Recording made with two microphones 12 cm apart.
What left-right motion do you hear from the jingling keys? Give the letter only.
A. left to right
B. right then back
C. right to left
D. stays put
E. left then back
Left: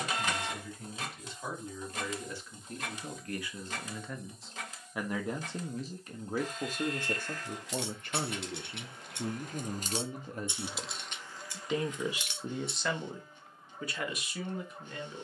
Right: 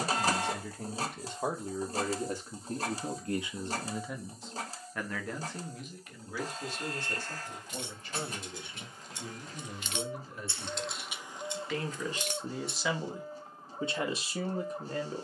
A.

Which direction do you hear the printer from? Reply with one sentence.
You can hear the printer on the right.